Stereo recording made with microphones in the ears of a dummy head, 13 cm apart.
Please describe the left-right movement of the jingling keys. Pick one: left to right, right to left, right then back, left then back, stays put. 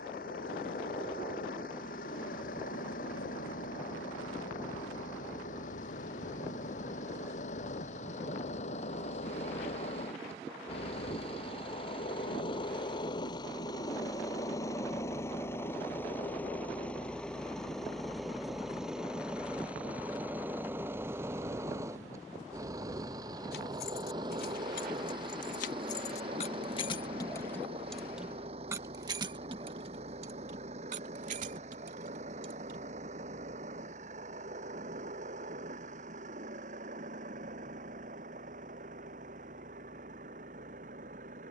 left to right.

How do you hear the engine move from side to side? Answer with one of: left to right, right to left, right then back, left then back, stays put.
left to right.